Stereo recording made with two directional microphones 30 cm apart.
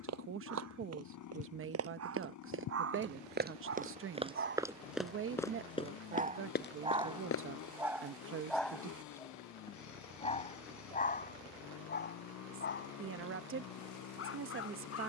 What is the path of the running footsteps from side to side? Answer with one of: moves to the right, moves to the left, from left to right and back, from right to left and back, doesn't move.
moves to the left.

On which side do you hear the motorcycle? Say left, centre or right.
left.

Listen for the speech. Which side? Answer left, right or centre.
right.